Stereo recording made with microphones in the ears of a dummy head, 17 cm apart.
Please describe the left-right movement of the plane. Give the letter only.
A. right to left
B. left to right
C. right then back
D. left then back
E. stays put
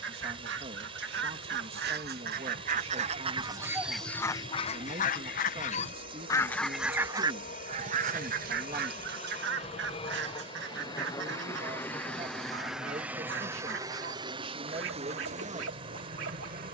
B.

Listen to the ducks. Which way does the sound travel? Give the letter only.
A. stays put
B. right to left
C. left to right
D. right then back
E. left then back
E.